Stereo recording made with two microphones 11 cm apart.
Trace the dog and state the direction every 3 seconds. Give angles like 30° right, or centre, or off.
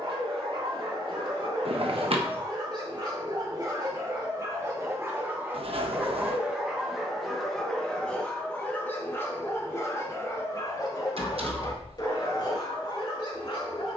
50° right, 30° right, centre, 30° left, 50° left.